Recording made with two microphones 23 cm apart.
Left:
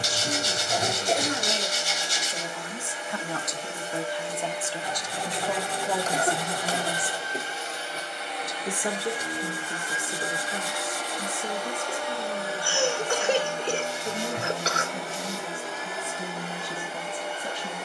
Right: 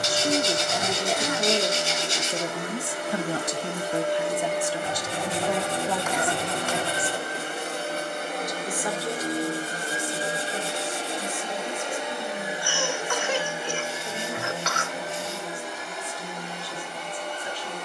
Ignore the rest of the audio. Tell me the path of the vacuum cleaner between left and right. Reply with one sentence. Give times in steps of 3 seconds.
In this clip you hear the vacuum cleaner on the right from 0 s and in the centre from 12 s.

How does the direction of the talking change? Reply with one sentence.
You can hear the talking go from the right side to the left.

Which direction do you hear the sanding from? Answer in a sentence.
In this clip you hear the sanding on the right.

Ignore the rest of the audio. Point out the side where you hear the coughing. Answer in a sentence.
In this clip you hear the coughing on the left.